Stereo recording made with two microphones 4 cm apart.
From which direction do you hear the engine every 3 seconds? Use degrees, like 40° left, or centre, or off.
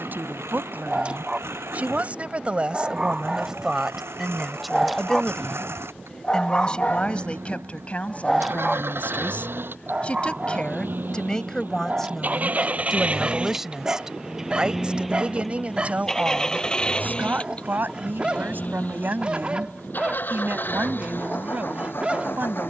80° right, 80° right, 70° right, 50° right, 20° right, 10° left, 40° left, 50° left.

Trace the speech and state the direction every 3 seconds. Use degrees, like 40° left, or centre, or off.
40° right, 10° right, 30° left, 20° left, 10° right, 40° right, 50° right, 50° right.